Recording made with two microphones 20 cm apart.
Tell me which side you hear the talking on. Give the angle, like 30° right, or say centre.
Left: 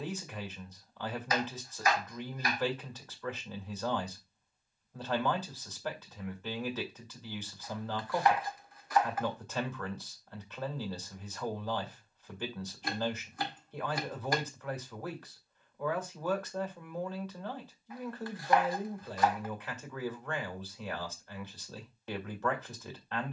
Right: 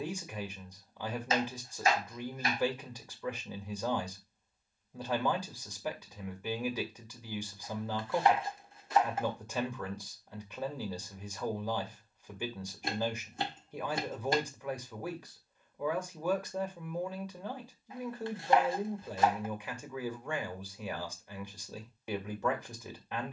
10° right.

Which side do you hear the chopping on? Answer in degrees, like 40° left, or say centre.
30° right.